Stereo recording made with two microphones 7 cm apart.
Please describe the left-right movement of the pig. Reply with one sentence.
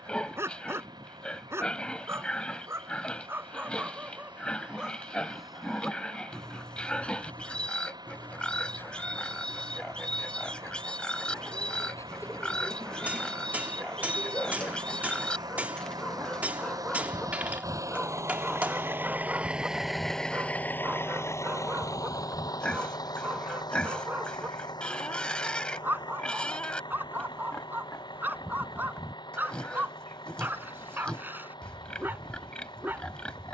In this clip you hear the pig stay in one place.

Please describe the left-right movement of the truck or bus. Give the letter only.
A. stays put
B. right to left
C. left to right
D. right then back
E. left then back
B.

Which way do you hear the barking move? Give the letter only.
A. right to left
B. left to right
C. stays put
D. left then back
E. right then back
D.